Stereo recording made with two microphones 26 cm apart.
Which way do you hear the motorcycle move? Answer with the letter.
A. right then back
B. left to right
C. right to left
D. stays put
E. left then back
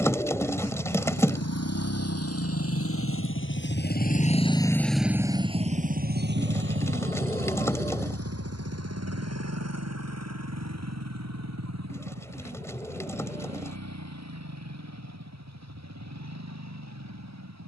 B.